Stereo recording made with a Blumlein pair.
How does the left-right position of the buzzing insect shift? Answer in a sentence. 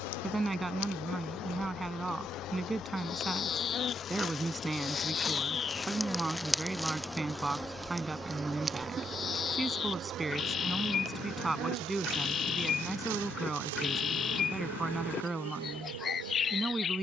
In this clip you hear the buzzing insect move to the right.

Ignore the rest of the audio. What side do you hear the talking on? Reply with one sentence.
In this clip you hear the talking in the centre.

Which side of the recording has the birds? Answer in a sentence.
In this clip you hear the birds on the left.